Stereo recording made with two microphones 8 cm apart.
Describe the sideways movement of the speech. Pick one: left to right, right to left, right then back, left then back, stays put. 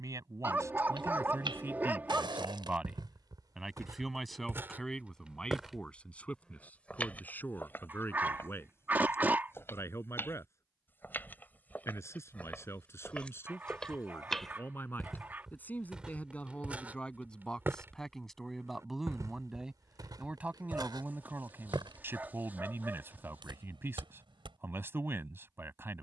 left then back.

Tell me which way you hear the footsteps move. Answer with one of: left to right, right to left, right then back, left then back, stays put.
left then back.